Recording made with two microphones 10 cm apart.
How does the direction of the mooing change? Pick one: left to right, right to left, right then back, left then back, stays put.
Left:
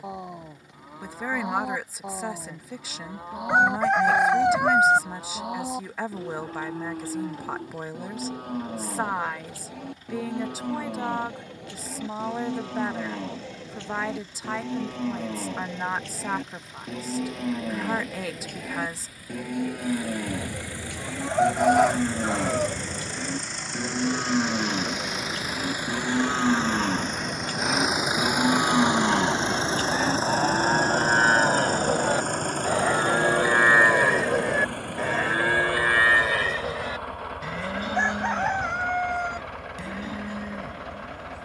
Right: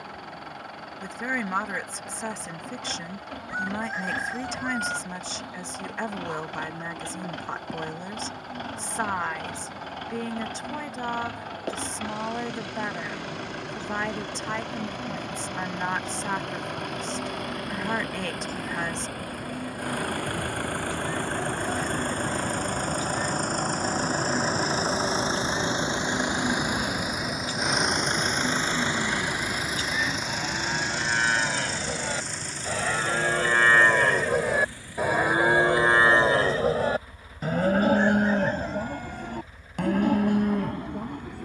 left to right.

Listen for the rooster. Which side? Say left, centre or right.
left.